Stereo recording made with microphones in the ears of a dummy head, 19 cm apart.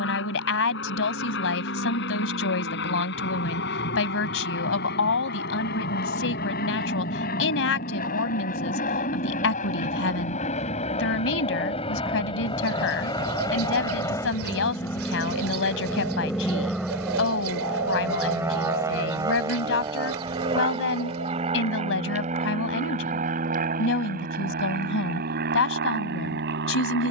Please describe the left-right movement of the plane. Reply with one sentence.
In this clip you hear the plane travel towards the right.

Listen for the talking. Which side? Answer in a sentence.
You can hear the talking on the left.